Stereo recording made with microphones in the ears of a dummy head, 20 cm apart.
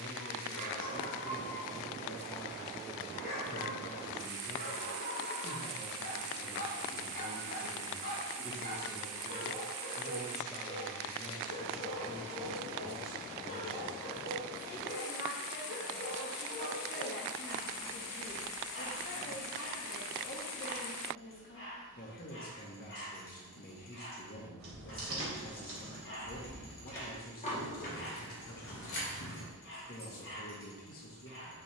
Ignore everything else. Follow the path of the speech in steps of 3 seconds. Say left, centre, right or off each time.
left, right, right, centre, left, left, left, left, left, left, left.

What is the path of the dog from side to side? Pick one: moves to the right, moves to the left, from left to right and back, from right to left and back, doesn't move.
doesn't move.